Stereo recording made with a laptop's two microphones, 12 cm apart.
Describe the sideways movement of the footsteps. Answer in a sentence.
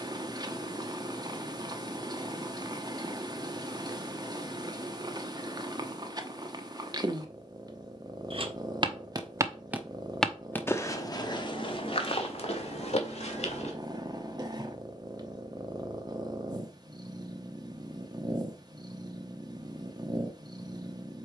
You can hear the footsteps move to the left.